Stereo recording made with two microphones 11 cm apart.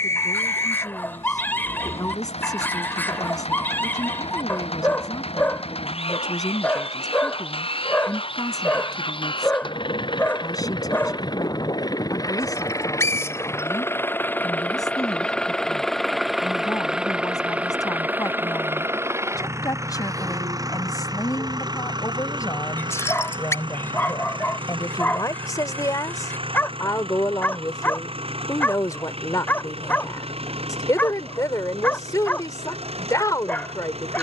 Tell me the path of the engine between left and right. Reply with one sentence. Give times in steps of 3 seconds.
In this clip you hear the engine on the left from 0 s, in the centre from 15 s and on the right from 18 s.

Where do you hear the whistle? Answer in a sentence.
You can hear the whistle on the left.